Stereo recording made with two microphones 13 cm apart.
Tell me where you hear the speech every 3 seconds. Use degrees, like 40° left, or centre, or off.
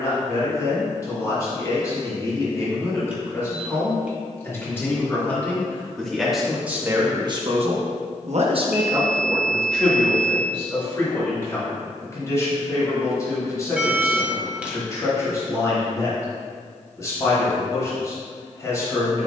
30° left, 20° left, 30° right, 10° left, 30° left, 30° left, 30° left.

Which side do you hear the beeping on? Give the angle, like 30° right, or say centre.
10° right.